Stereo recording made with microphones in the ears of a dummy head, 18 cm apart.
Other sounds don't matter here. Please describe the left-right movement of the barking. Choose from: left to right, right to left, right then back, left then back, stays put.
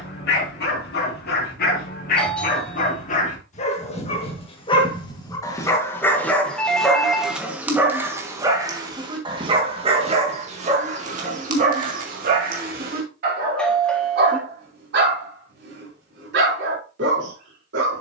left to right.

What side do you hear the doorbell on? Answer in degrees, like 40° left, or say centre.
centre.